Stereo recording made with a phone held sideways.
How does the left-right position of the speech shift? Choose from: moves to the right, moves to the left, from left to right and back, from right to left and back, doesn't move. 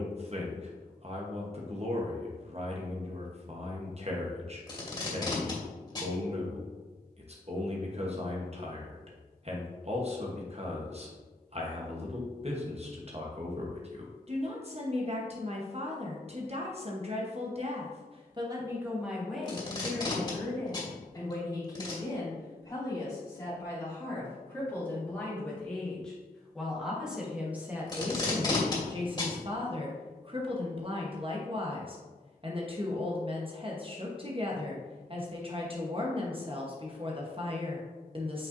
from right to left and back.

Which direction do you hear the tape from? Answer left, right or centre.
left.